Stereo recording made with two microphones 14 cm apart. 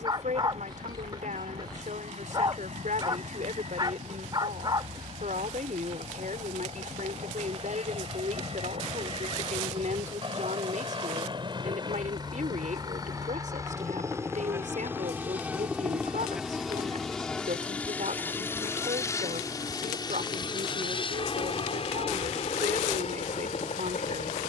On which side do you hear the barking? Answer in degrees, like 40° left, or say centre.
30° right.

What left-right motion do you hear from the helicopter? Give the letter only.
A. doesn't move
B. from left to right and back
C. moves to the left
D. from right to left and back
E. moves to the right
C.